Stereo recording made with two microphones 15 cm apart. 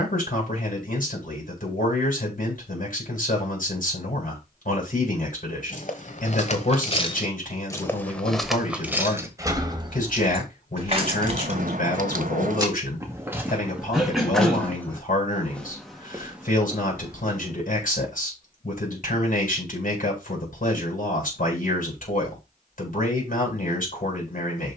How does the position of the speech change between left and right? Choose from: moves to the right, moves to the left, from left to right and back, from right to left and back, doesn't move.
doesn't move.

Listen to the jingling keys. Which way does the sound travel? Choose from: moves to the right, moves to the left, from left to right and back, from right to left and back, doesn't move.
moves to the right.